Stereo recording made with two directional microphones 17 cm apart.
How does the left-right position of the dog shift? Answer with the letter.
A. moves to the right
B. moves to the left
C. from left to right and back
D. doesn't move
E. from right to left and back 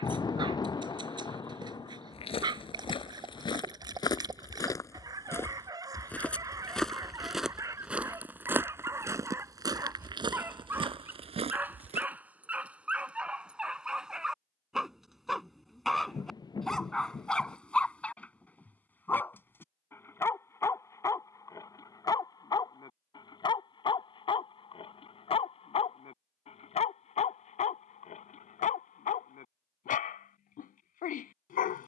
B.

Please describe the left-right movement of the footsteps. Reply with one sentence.
In this clip you hear the footsteps go from the left side to the right.